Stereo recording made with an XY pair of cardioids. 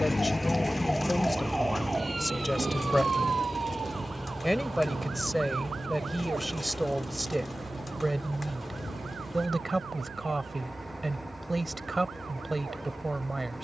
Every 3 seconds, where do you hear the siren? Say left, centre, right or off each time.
centre, right, right, right, right.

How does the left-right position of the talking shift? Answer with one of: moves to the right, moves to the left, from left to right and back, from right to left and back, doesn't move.
moves to the right.